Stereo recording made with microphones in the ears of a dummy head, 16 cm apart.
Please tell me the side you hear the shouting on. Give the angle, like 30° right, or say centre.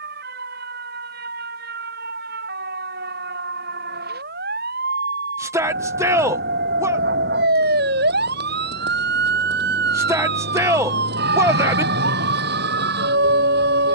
10° right.